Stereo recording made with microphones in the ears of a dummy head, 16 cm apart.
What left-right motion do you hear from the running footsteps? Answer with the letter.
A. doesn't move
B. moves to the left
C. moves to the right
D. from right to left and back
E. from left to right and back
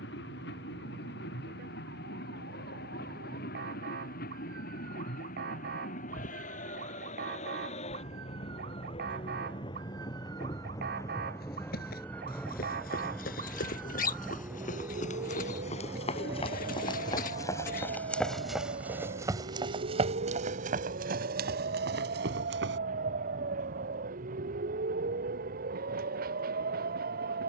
C.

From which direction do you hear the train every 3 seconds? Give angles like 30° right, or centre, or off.
60° left, 50° left, 40° left, 20° left, centre, 20° right, 30° right, 40° right, 50° right.